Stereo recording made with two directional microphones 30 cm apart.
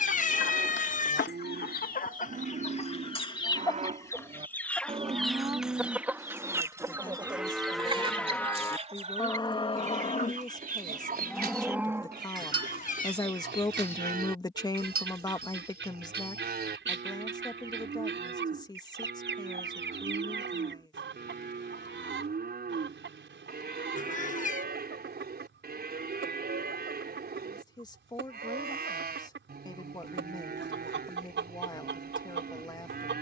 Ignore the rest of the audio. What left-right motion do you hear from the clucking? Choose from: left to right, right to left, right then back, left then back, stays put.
left to right.